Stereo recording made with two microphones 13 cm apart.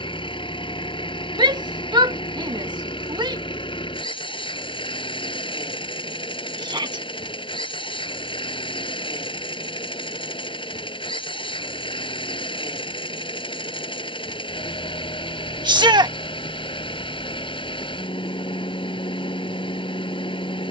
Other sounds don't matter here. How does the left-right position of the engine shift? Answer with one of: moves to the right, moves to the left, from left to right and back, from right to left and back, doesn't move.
doesn't move.